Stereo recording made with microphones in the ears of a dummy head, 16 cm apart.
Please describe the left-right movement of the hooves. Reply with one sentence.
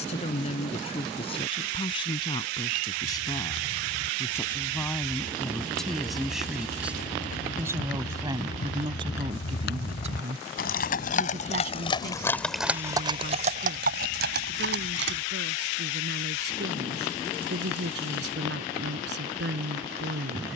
In this clip you hear the hooves move to the right.